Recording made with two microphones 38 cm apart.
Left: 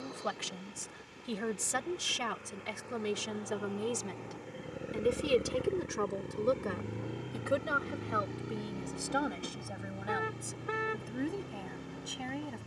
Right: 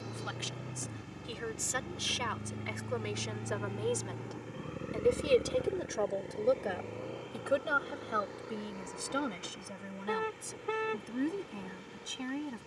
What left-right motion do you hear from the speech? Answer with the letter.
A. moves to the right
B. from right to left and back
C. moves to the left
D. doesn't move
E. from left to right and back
A.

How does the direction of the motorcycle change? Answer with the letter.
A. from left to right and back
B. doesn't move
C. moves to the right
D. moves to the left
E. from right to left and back
D.